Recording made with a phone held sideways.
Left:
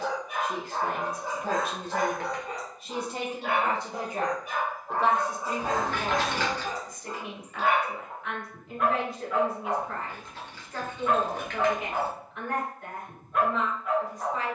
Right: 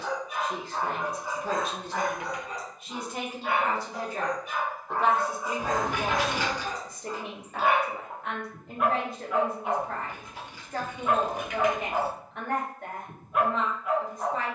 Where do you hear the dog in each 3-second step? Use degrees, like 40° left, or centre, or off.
60° left, 40° left, centre, 10° right, 10° right.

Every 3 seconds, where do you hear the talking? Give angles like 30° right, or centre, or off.
50° left, 10° left, 40° right, 50° right, 50° right.